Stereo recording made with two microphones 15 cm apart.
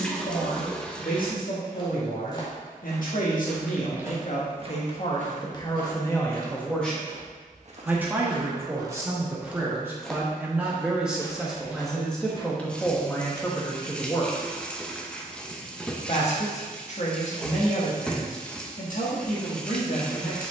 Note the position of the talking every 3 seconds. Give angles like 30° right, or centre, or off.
70° left, 50° left, centre, 10° right, 10° left, 50° left, 60° left.